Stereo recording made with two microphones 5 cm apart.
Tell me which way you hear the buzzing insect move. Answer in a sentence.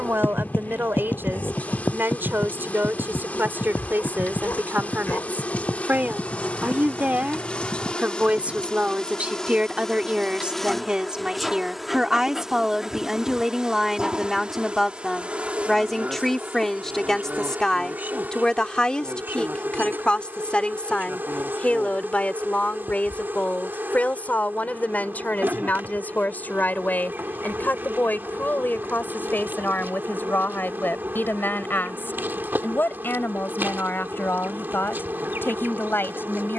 You can hear the buzzing insect go from the left side to the right.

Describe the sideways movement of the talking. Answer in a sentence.
In this clip you hear the talking move to the left.